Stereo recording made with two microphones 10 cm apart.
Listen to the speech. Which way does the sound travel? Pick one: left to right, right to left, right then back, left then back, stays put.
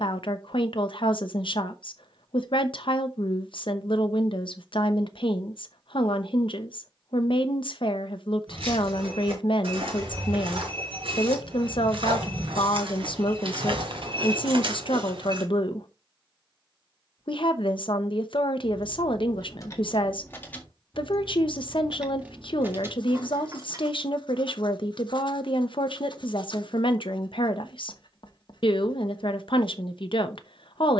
stays put.